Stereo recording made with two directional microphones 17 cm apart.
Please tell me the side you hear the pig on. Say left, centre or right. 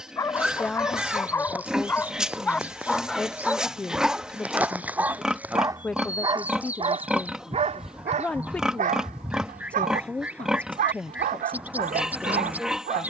centre.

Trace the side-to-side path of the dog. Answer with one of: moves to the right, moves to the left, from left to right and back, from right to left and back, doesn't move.
moves to the right.